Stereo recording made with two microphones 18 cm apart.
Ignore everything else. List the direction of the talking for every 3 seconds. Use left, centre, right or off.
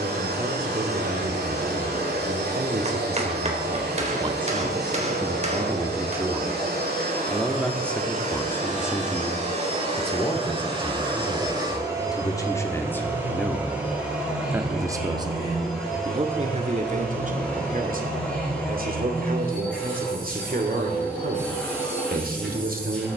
right, right, centre, left, centre, right, right, right.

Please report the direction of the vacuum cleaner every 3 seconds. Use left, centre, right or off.
right, right, right, right, centre, centre, centre, centre.